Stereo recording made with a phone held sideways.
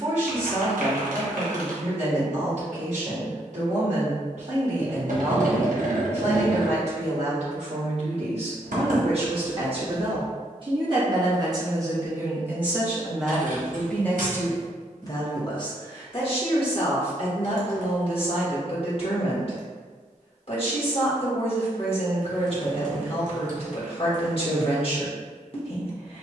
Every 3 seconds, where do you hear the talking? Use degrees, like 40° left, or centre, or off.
60° right, 60° right, 60° right, 40° right, centre, 40° left, 50° left, 50° left, 50° left.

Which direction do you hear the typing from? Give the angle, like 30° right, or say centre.
80° right.